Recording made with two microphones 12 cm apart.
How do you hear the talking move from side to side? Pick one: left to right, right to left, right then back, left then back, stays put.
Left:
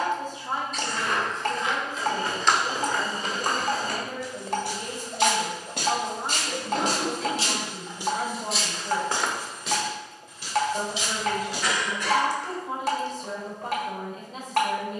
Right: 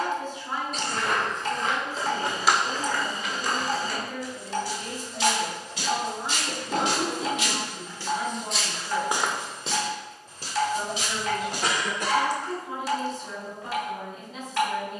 stays put.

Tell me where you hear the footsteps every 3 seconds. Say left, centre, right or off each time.
right, left, left, right, off.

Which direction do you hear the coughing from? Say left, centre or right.
right.